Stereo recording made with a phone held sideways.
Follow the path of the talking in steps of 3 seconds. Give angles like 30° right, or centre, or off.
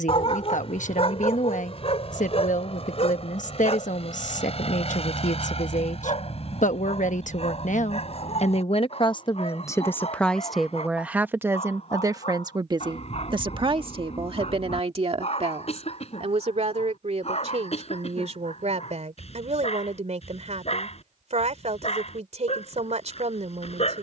60° left, 60° left, 60° left, centre, 40° right, 50° right, 50° right, 50° right.